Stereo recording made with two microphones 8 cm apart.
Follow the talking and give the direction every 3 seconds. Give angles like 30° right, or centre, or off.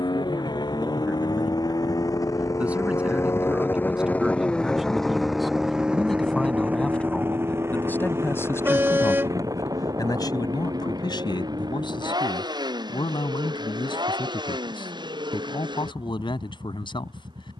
20° right, 10° right, 20° left, 60° left, 80° left, 80° left.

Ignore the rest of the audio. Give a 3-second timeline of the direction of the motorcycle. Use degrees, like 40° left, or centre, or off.
50° left, 10° left, 30° right, 50° right, 60° right, 60° right.